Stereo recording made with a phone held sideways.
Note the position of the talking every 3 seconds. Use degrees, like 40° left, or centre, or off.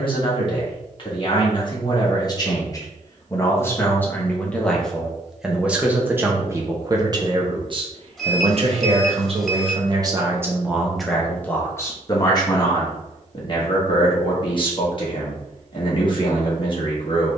30° left, 10° left, 30° right, 20° right, 30° left, 40° left.